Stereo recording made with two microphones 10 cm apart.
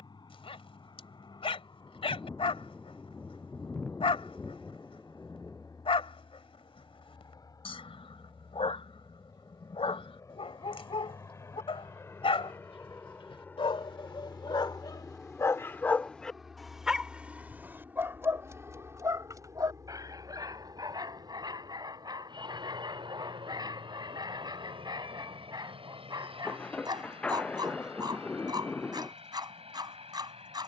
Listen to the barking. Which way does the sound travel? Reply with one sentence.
You can hear the barking go from the left side to the right.